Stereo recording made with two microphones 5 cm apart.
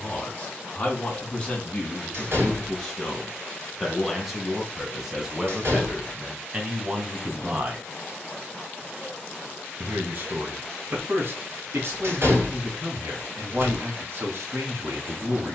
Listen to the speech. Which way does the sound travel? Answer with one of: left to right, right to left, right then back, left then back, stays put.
left to right.